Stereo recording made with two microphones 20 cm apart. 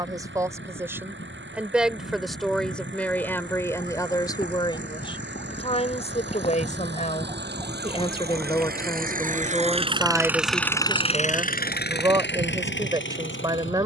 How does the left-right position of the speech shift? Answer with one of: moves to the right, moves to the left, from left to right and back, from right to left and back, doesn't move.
from right to left and back.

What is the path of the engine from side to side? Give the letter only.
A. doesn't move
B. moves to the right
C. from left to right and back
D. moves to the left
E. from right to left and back
D.